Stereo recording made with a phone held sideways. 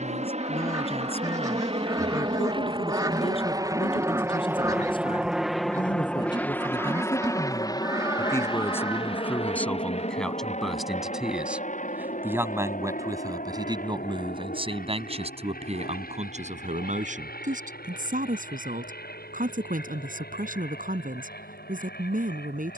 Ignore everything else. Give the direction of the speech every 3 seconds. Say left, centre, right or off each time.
left, left, left, centre, right, right, right, right.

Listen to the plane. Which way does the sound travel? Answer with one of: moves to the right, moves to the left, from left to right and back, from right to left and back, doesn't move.
moves to the left.